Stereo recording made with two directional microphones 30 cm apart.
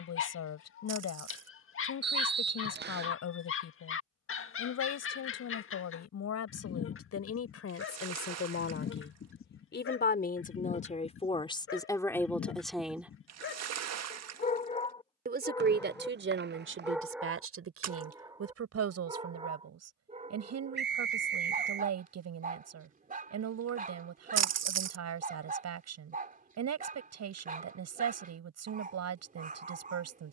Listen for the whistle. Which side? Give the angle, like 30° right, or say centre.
30° right.